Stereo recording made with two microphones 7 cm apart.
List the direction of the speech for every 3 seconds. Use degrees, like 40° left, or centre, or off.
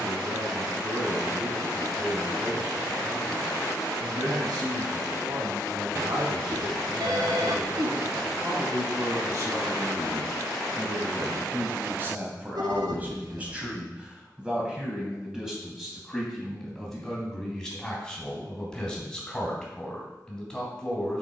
70° right, 70° right, 50° right, 40° right, 20° right, centre, 10° left.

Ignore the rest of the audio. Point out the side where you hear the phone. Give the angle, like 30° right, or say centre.
60° right.